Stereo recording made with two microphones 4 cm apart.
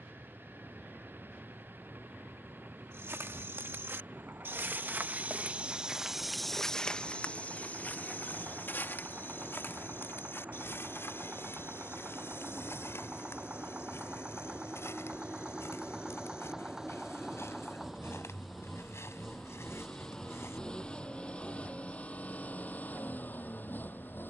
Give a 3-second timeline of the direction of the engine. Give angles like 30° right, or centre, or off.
50° right, 50° right, 40° right, 40° right, 30° right, 10° right, 10° left, 40° left.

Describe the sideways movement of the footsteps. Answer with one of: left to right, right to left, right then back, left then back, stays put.
right to left.